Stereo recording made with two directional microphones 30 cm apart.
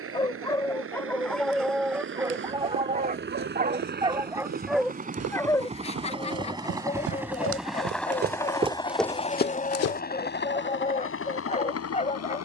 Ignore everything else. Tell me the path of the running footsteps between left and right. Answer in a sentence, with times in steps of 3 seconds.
In this clip you hear the running footsteps on the right from 0 s and on the left from 9 s.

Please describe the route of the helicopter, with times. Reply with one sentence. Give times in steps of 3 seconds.
You can hear the helicopter on the right from 0 s, in the centre from 6 s and on the left from 9 s.